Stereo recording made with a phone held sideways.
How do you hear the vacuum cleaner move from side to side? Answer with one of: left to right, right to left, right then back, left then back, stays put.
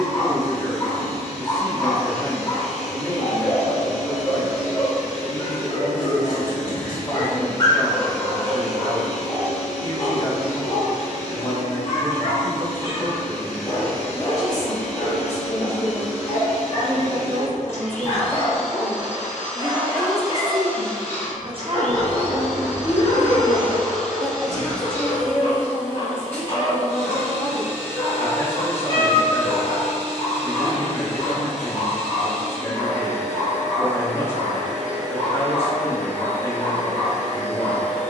stays put.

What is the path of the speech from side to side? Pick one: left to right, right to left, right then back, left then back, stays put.
right then back.